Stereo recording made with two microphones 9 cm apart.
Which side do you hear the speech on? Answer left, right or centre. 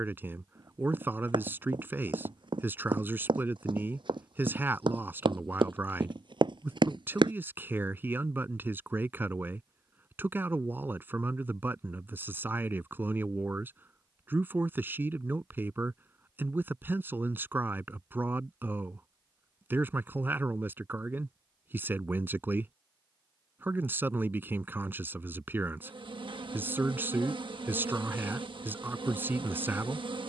right.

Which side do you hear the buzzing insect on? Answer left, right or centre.
right.